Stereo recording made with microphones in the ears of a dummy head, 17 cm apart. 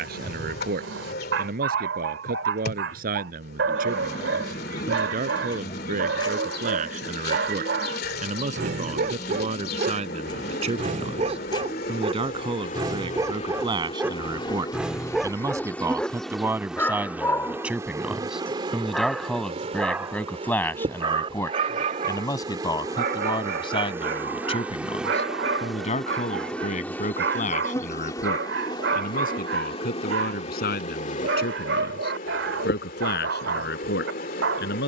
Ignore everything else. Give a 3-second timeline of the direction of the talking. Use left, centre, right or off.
right, right, right, right, right, centre, centre, left, left, left, left, left.